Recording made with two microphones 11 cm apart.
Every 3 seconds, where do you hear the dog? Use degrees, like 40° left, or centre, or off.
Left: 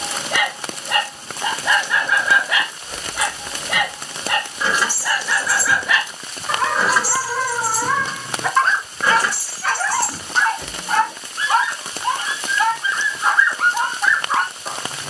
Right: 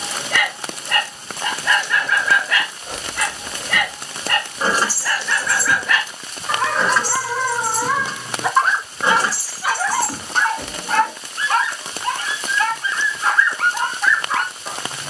20° left, 10° left, centre, centre, 20° left.